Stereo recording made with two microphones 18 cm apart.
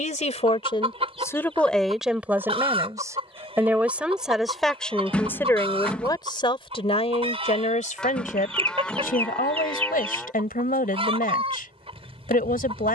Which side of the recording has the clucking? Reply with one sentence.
You can hear the clucking on the right.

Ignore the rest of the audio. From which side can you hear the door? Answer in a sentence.
You can hear the door in the centre.